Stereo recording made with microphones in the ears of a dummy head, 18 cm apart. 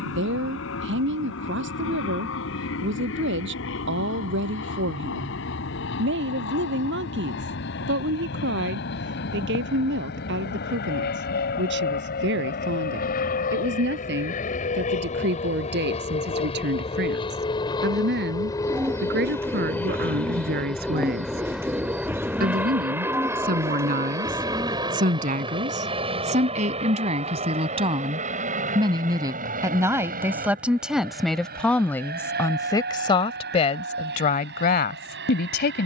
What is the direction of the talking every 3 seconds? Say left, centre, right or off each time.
right, right, right, right, right, right, right, right, right, right, centre, left.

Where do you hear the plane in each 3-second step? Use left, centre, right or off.
left, left, left, left, left, left, centre, centre, right, right, right, right.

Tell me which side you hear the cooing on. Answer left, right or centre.
centre.